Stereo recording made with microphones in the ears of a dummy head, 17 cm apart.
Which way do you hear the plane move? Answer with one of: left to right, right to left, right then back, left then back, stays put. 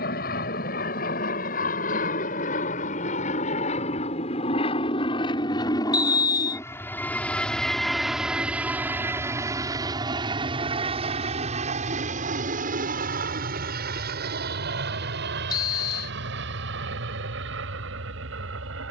left to right.